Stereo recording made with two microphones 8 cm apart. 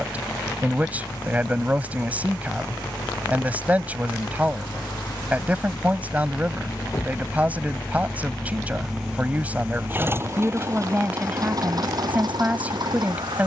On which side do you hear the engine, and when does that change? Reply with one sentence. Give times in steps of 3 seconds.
In this clip you hear the engine on the left from 0 s and on the right from 9 s.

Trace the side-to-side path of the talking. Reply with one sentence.
In this clip you hear the talking stay in one place.